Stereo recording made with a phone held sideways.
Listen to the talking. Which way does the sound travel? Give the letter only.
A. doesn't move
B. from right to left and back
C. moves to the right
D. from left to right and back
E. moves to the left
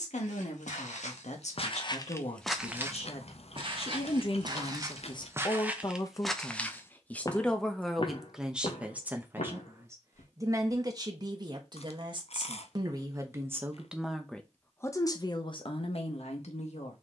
D.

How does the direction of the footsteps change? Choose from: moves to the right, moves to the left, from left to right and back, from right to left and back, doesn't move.
from left to right and back.